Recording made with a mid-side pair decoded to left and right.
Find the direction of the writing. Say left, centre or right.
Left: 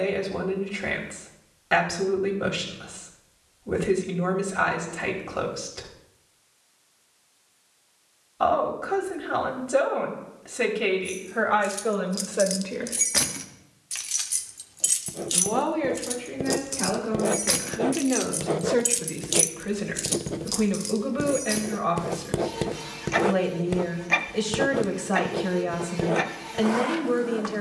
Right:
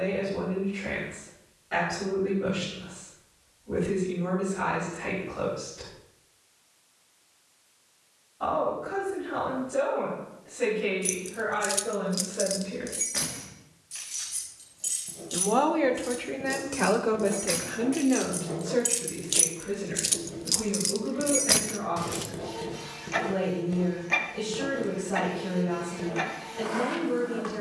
left.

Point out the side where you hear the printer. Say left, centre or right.
left.